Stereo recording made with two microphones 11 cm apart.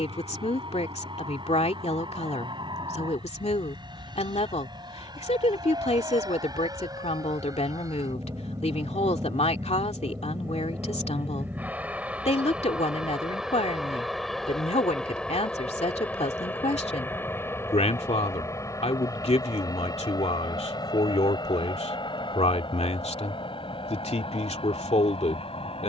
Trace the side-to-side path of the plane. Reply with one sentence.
You can hear the plane move to the left.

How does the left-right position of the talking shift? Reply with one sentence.
In this clip you hear the talking stay in one place.